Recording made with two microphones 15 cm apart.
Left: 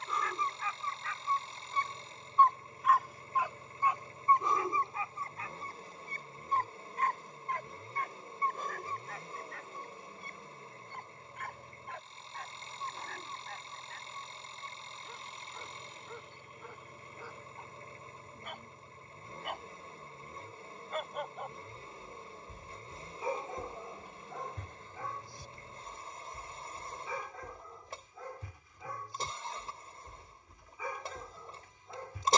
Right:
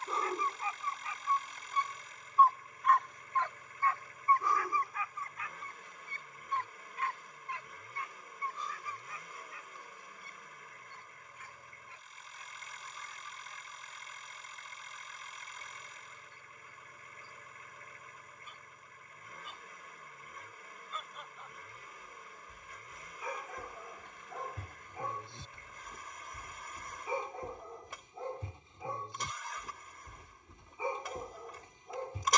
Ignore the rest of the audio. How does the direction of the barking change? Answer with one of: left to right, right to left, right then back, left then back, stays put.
left then back.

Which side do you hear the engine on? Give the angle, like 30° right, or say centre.
30° left.